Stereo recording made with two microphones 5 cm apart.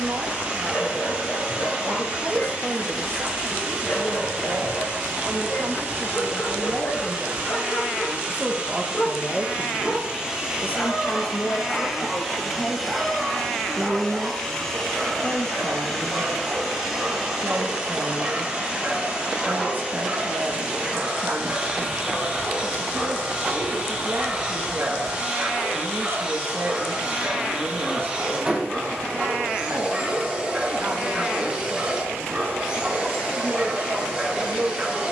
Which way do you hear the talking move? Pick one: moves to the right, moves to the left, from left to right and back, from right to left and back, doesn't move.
from right to left and back.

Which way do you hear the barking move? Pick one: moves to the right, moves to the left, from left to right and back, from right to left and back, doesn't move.
moves to the right.